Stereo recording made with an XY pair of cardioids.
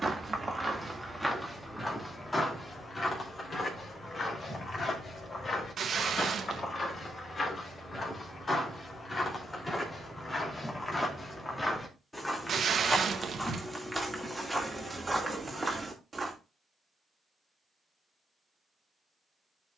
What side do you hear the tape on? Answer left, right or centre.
right.